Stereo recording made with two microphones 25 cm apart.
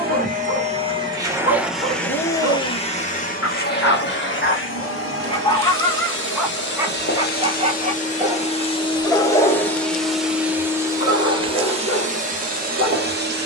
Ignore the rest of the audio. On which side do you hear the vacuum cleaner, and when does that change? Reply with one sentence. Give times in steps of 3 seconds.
You can hear the vacuum cleaner in the centre from 0 s, on the left from 3 s, in the centre from 9 s and on the right from 12 s.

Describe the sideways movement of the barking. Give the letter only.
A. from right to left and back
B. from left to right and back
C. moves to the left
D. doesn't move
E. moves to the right
B.